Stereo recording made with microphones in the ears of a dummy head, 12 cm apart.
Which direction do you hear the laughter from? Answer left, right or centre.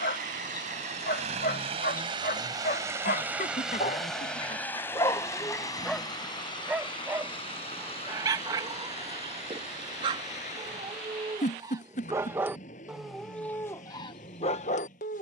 left.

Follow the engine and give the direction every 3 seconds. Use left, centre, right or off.
right, centre, left, left, left.